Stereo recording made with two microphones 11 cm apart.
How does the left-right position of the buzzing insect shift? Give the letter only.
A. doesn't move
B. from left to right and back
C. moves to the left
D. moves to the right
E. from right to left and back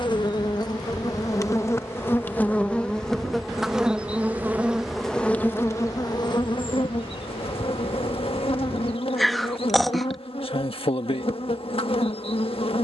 B.